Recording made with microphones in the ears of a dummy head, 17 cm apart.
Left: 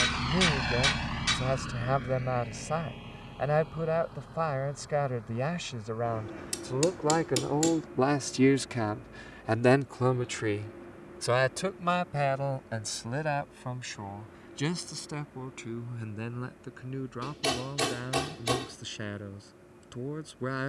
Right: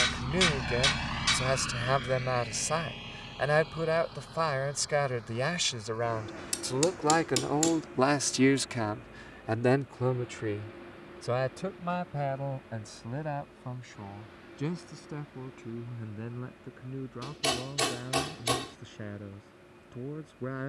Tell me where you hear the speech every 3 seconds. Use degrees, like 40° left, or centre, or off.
80° right, 80° right, 50° right, 30° left, 50° left, 60° left, 60° left.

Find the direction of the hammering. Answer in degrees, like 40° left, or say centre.
20° right.